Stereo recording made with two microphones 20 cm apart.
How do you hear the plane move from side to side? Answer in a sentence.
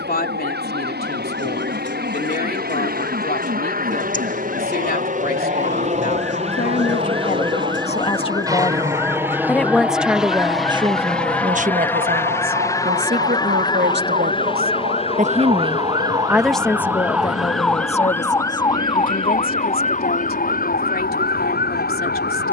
In this clip you hear the plane travel towards the left.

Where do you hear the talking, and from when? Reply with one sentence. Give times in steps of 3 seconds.
You can hear the talking on the left from 0 s, on the right from 9 s, in the centre from 15 s and on the left from 18 s.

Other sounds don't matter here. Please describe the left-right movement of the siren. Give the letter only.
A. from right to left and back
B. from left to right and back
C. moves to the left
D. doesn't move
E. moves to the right
C.